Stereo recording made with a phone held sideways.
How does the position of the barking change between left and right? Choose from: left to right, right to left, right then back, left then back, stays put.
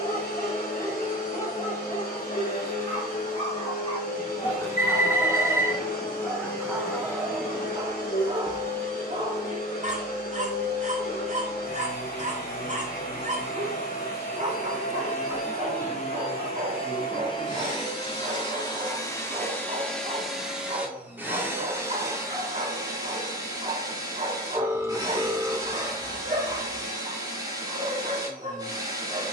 left to right.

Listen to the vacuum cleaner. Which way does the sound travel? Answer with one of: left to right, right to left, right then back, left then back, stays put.
left to right.